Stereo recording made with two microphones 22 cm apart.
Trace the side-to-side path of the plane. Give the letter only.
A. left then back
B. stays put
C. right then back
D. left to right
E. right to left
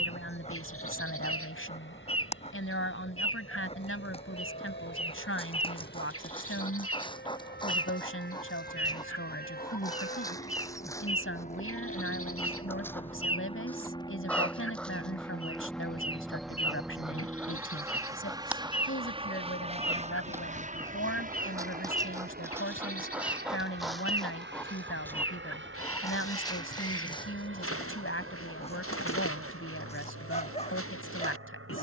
D.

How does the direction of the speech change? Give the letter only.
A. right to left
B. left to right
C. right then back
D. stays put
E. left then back
D.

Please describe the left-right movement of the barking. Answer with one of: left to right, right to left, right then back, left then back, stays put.
right then back.